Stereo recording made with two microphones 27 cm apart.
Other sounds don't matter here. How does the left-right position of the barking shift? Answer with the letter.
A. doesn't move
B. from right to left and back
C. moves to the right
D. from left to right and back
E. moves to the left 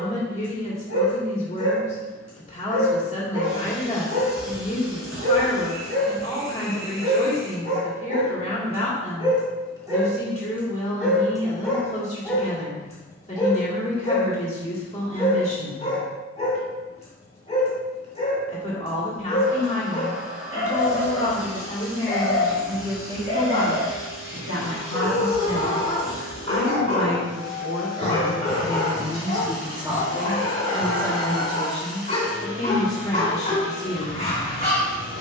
E.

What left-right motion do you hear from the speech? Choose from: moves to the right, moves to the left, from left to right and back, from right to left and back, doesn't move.
from left to right and back.